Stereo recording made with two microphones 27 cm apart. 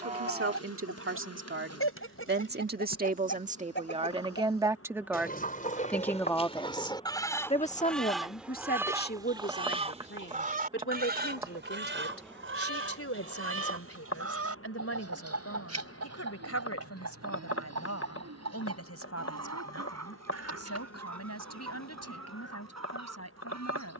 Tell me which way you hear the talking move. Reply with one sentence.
In this clip you hear the talking travel towards the left.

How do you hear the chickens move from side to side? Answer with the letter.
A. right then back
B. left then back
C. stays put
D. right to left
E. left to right
E.